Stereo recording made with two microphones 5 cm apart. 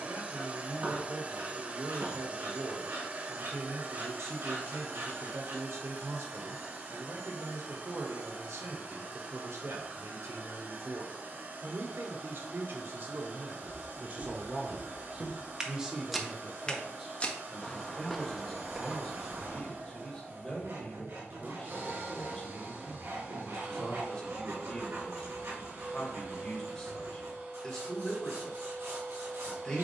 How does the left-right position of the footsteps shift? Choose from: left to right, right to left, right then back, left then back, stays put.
left then back.